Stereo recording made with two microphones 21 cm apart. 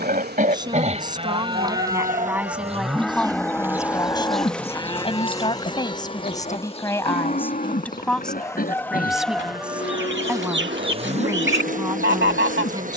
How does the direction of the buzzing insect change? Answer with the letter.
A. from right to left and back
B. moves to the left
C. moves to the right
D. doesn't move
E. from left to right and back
A.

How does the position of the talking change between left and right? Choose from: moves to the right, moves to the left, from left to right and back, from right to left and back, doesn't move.
from right to left and back.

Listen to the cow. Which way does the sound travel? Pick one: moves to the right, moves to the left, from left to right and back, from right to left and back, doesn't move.
moves to the left.